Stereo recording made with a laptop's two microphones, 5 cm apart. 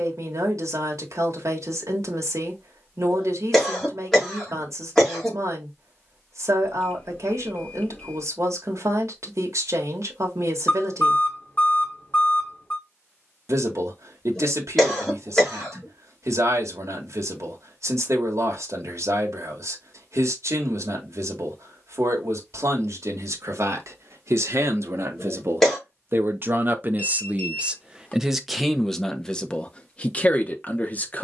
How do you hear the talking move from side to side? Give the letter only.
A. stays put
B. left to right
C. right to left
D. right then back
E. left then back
C.